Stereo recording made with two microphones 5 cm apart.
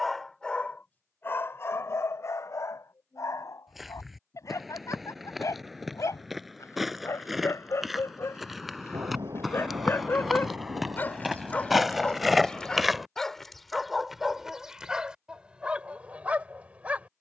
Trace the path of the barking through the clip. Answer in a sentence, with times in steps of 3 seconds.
In this clip you hear the barking on the left from 0 s, in the centre from 12 s and on the right from 15 s.